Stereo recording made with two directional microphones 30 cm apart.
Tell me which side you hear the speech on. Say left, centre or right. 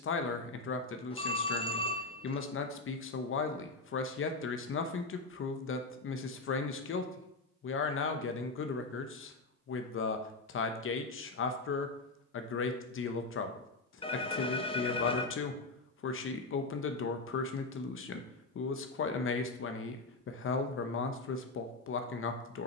left.